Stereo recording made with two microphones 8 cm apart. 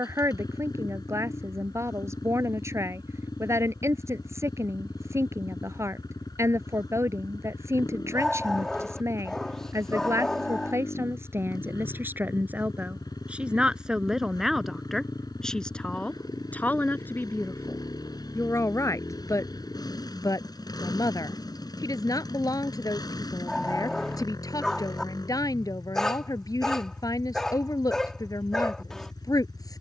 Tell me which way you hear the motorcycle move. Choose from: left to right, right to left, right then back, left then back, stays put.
stays put.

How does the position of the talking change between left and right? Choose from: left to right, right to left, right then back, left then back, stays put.
right to left.